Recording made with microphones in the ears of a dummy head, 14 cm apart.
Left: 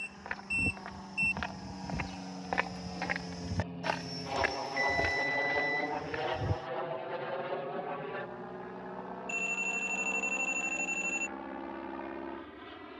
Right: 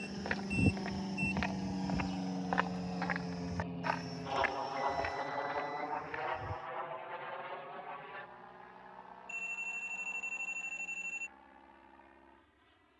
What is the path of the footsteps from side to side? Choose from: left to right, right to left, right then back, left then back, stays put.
right to left.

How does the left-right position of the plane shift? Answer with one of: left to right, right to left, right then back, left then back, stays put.
right to left.